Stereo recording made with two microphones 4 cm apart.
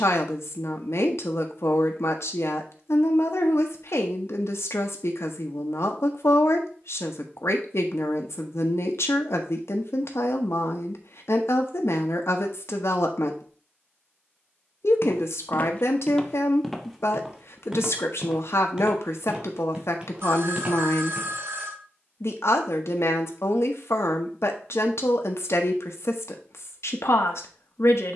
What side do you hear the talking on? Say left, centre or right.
left.